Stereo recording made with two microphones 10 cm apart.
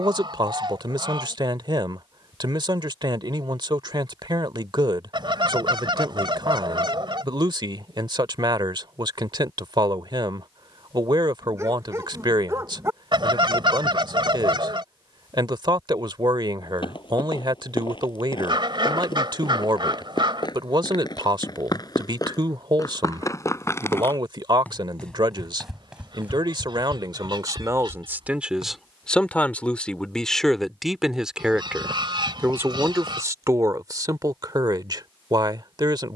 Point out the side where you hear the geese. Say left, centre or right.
right.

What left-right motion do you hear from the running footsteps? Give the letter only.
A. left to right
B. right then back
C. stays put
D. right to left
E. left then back
A.